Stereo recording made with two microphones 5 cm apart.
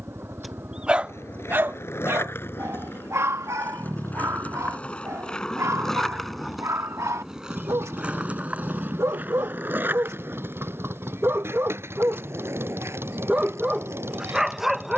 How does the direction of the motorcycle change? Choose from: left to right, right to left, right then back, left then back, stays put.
stays put.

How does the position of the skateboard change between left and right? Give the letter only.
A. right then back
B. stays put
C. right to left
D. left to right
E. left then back
D.